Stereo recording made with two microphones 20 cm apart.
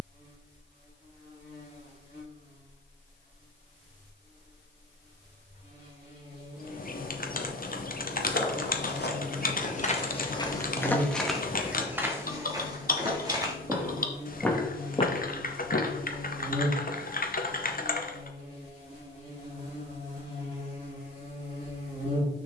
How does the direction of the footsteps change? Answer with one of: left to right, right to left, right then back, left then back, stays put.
right then back.